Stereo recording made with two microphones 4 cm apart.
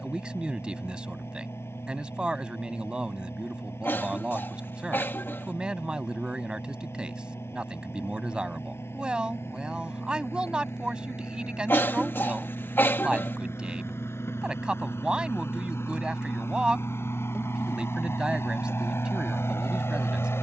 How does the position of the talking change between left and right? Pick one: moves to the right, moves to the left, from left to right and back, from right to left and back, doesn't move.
doesn't move.